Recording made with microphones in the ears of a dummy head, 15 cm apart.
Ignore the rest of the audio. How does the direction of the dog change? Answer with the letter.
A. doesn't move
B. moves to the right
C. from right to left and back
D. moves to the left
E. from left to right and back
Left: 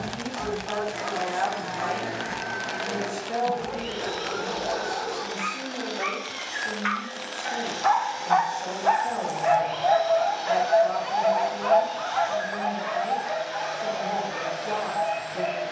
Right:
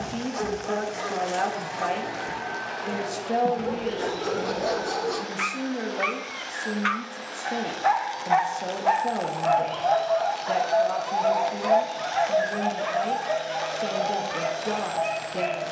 C.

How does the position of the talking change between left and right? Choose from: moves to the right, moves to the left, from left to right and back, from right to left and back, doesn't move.
doesn't move.